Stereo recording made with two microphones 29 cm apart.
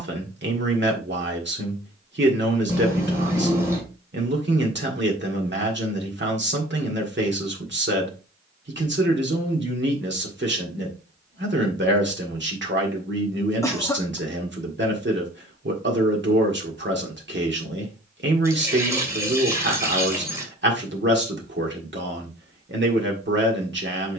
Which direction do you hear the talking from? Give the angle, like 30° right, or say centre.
40° right.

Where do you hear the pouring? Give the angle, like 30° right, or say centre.
10° right.